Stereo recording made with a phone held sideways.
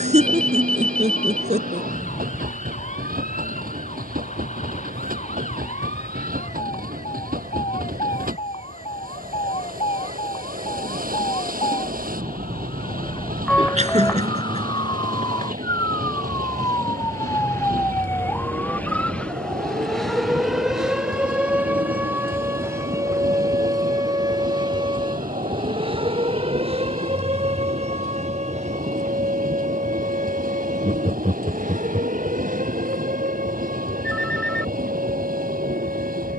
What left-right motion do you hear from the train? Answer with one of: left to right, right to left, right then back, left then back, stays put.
stays put.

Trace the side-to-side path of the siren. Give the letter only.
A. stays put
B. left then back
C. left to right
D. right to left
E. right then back
C.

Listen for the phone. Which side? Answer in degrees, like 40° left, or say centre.
10° left.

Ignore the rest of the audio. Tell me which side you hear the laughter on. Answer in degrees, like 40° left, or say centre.
50° right.